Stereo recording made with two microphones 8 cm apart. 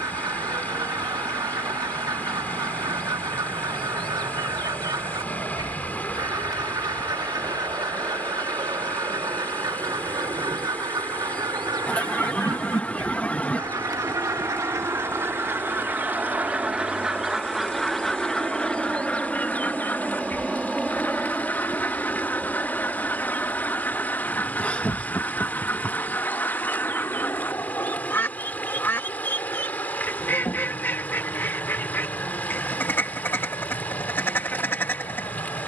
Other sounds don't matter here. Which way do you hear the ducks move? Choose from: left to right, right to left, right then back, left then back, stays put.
right to left.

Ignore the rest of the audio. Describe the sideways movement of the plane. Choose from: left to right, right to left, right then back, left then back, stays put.
right to left.